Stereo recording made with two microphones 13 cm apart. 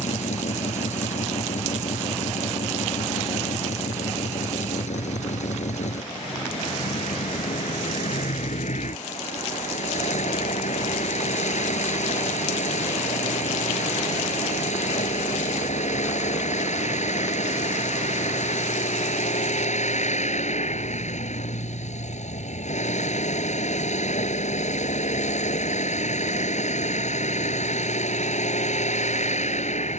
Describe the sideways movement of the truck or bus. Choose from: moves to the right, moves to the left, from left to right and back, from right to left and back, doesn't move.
doesn't move.